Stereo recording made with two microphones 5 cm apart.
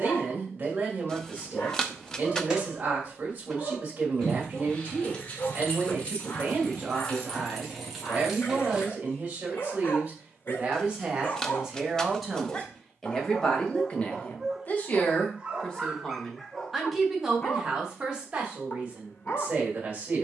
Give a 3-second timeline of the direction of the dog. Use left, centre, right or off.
left, left, left, left, centre, centre, left.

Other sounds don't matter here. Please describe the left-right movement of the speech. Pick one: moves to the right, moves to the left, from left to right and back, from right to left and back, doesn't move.
from right to left and back.